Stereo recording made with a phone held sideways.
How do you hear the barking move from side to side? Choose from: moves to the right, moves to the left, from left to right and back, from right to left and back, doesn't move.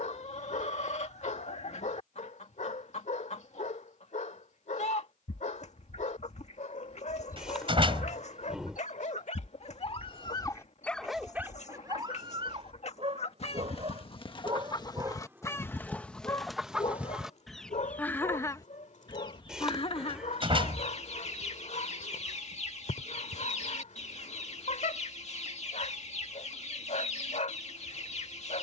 from left to right and back.